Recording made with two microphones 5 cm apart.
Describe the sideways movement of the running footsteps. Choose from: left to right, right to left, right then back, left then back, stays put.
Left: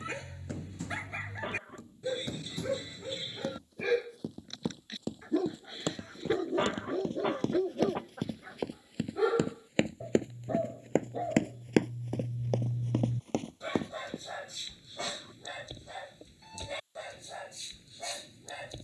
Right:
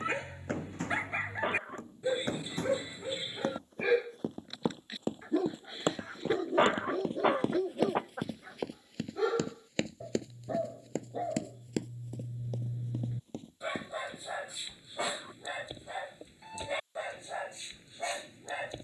right to left.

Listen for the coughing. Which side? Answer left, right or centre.
right.